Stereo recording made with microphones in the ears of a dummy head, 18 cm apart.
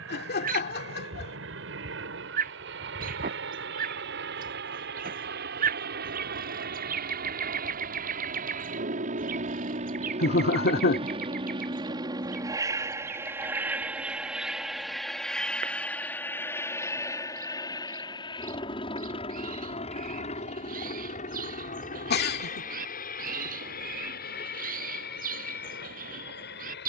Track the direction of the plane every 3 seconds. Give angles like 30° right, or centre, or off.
70° right, 60° right, 50° right, 30° right, 10° right, 10° left, 30° left, 40° left, 50° left.